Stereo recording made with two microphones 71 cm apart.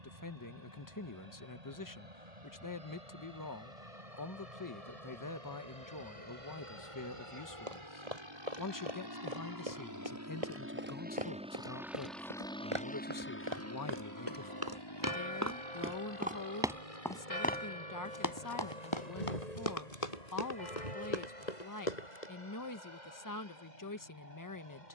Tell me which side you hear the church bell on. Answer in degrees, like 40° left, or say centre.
80° left.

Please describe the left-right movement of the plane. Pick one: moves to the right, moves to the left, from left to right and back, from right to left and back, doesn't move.
moves to the left.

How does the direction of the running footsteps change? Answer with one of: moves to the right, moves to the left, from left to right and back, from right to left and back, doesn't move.
moves to the left.